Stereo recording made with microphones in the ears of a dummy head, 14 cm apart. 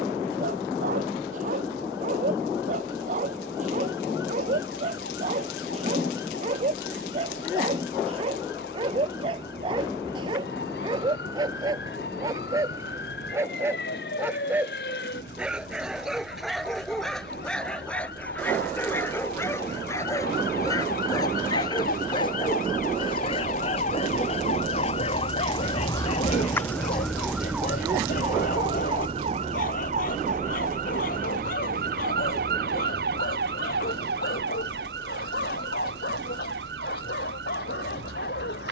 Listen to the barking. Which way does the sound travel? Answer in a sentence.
You can hear the barking travel towards the left.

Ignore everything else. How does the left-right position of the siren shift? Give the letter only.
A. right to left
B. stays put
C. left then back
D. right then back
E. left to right
E.